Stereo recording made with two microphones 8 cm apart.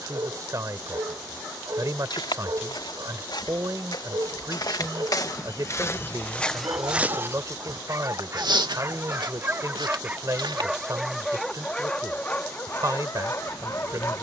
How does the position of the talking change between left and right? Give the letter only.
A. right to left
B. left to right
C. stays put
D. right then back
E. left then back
C.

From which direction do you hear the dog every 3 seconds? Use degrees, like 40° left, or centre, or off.
60° right, 60° right, 40° right, 10° right, 30° left.